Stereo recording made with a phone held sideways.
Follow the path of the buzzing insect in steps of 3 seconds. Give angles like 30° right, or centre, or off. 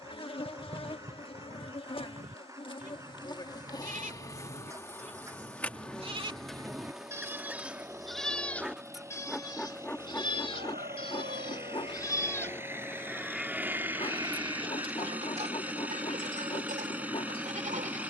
40° left, 20° left, centre, 20° left, 40° left, 40° left.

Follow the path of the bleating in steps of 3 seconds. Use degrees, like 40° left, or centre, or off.
60° right, 50° right, 10° right, 30° left, 10° right, 50° right.